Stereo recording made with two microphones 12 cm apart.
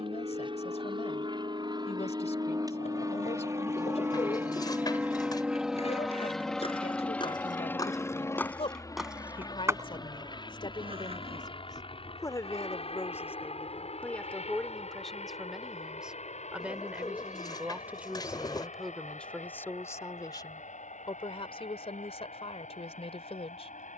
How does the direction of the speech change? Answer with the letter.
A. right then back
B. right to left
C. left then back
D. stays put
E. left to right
A.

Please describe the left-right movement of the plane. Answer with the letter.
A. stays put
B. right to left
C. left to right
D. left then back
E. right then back
B.